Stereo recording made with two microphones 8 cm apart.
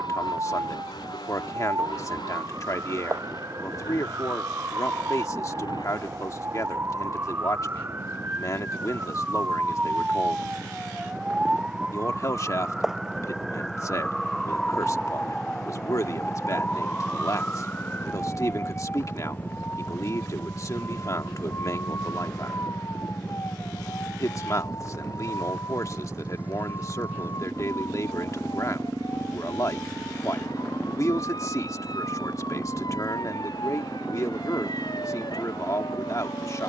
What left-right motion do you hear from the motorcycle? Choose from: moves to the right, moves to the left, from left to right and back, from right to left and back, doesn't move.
moves to the right.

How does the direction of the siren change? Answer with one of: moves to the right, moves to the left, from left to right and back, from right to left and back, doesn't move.
moves to the left.